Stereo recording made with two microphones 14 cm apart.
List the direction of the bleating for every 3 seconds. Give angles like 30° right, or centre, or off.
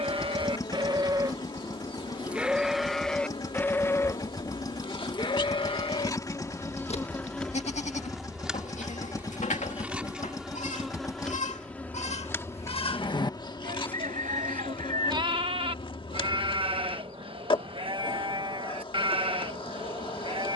20° right, 30° left, 50° left, 60° left, 30° left, 40° right, 40° right.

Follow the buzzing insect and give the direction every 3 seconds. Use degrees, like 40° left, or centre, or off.
40° left, 40° left, 10° left, centre, 30° left, 40° left, 40° left.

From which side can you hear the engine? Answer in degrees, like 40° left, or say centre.
30° left.